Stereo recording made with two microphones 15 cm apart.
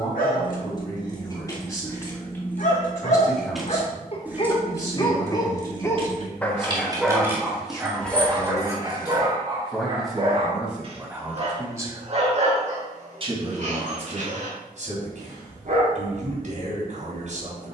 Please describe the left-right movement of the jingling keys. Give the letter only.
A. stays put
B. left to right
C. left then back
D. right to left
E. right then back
E.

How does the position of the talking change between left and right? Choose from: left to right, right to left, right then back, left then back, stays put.
left to right.